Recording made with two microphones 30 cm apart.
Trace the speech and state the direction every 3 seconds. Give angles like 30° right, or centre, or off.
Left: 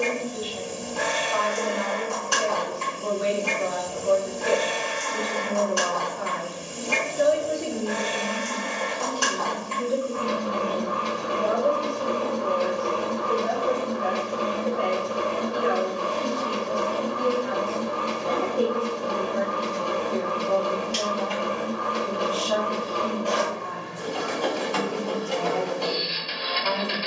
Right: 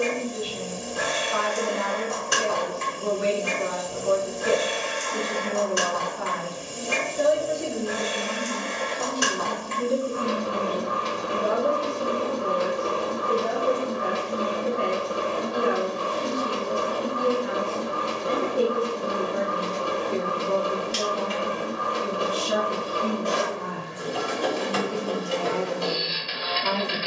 30° right, 20° right, centre, 30° right, 30° right, 30° right, 30° right, 30° right, 30° right.